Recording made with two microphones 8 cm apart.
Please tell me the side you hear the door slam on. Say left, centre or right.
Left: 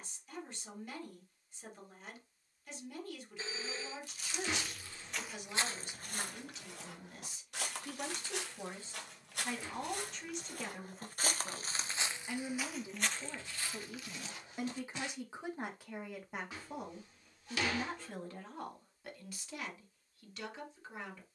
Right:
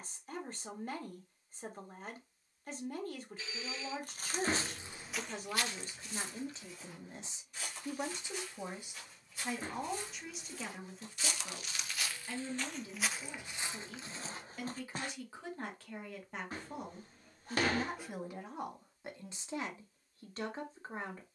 right.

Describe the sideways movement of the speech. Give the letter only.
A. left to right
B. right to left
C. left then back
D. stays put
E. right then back
C.